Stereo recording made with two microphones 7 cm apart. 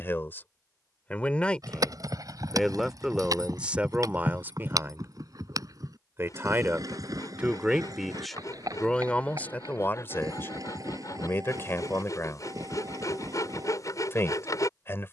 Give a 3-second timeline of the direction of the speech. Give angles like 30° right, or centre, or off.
10° left, 20° right, 10° right, 30° left, 30° left.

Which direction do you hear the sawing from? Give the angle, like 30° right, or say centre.
50° left.